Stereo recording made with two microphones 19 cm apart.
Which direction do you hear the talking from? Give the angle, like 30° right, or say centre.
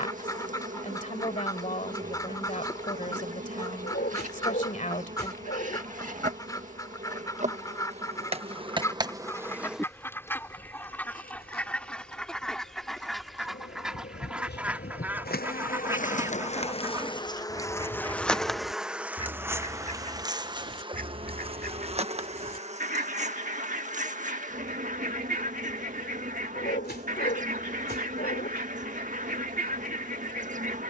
40° left.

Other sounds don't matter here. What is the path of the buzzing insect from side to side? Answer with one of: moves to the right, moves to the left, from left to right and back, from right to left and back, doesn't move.
from right to left and back.